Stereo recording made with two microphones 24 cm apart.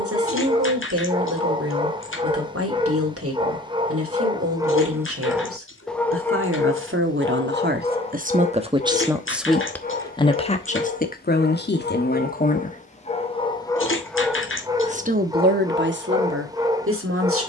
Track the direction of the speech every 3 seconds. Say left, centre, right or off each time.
right, right, right, left, left, right.